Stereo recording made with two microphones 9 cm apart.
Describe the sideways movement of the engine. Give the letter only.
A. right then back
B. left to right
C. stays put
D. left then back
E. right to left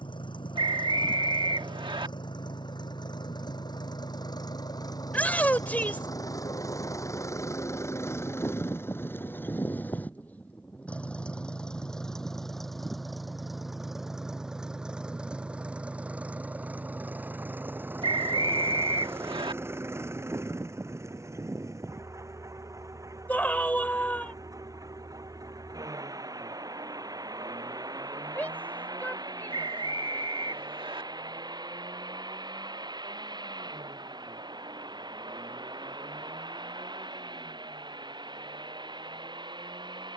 B.